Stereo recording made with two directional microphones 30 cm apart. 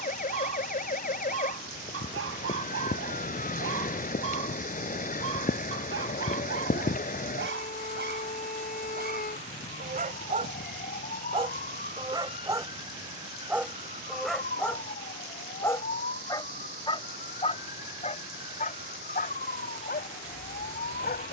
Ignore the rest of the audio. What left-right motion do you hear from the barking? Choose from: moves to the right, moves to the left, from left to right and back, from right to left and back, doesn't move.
moves to the left.